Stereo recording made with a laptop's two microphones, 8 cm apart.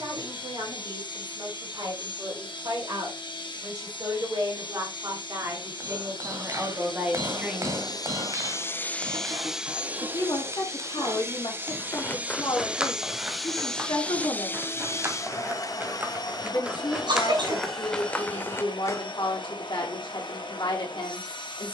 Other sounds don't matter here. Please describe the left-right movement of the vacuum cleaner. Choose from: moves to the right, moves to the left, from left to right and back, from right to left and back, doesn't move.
from left to right and back.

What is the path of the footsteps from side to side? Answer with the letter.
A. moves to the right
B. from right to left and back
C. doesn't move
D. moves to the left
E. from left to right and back
E.